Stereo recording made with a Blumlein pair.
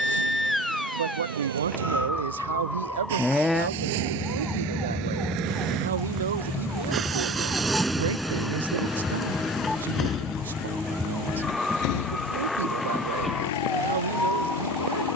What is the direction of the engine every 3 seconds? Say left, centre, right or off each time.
right, right, centre, left, left.